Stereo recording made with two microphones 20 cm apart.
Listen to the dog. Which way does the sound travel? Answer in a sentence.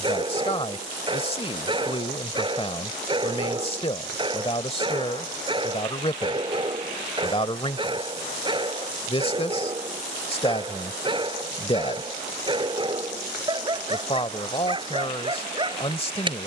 You can hear the dog stay in one place.